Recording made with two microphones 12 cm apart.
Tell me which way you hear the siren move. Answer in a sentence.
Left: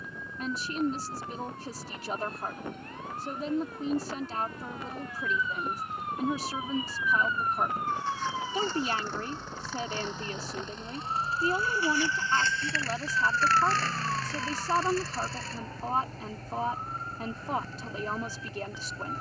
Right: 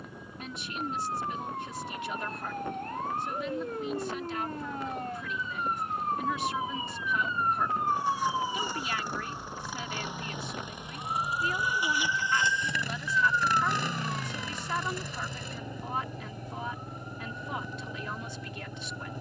In this clip you hear the siren go from the right side to the left.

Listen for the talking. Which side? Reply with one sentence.
In this clip you hear the talking on the left.